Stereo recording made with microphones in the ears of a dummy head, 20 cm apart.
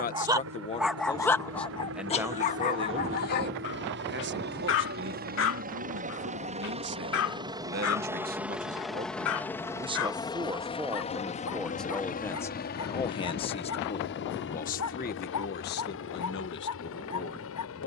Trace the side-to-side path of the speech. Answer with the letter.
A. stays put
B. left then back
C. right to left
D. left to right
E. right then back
E.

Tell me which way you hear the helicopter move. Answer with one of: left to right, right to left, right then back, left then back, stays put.
right to left.